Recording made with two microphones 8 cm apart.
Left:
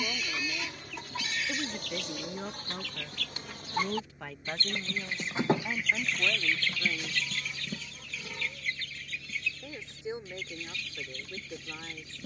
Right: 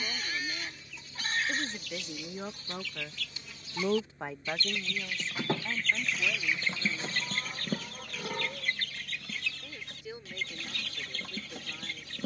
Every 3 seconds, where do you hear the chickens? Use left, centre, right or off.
left, left, right, right.